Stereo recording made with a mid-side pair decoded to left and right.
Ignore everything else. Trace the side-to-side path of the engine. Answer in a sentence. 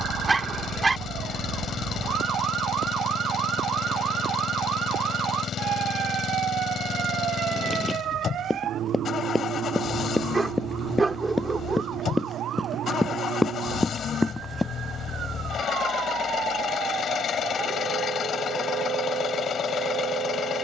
You can hear the engine stay put.